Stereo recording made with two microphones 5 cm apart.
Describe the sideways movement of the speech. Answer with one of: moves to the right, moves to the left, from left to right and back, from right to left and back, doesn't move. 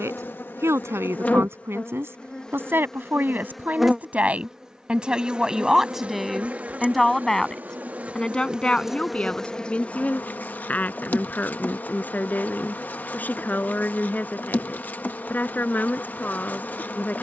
moves to the left.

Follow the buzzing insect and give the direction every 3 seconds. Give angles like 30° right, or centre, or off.
30° left, 10° right, 30° right, 30° left, 40° left, 40° left.